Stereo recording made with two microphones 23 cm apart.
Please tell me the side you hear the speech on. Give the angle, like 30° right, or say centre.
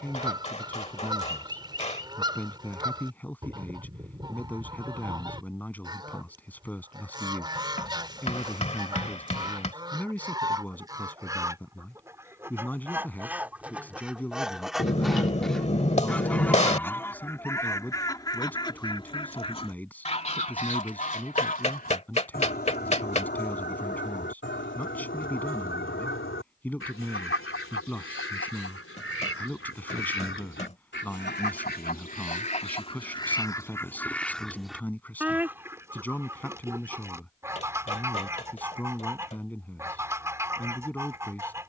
10° left.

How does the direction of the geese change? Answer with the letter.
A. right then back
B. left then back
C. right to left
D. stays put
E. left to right
B.